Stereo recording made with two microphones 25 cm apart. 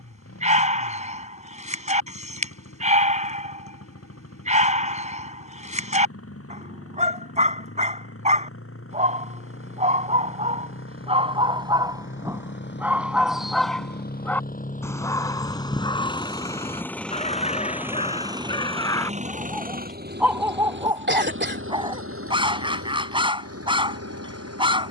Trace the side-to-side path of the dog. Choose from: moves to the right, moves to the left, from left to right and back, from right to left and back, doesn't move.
from right to left and back.